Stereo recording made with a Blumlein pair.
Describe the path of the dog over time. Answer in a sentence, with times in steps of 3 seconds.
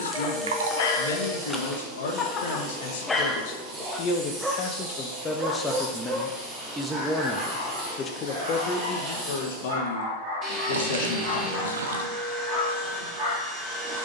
You can hear the dog on the left from 0 s, in the centre from 3 s and on the right from 6 s.